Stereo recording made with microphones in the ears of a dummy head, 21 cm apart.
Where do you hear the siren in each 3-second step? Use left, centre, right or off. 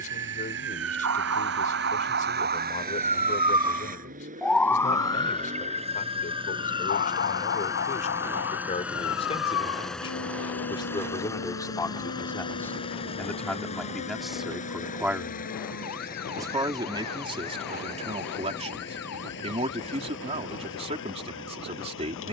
right, centre, left, left, left, left, left, left.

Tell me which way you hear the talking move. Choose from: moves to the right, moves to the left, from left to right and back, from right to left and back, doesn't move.
moves to the right.